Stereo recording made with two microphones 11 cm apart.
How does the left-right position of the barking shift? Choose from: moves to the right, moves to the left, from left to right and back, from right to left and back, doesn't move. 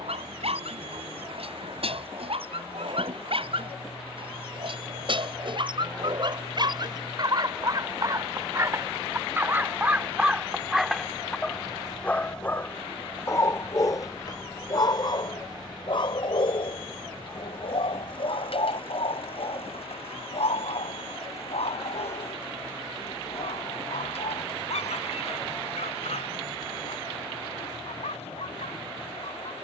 moves to the left.